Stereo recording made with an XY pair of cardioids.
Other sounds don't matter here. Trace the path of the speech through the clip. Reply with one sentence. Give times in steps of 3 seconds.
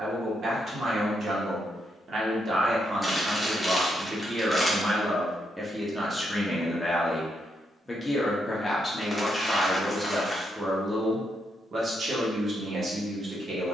You can hear the speech on the right from 0 s, in the centre from 6 s and on the right from 12 s.